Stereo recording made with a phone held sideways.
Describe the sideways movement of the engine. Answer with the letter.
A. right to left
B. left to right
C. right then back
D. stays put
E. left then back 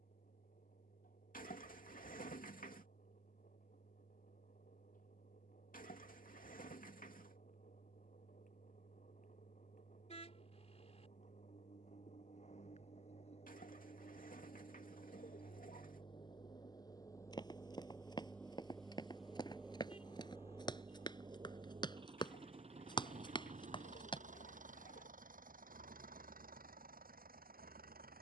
B.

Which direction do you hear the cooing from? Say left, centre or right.
left.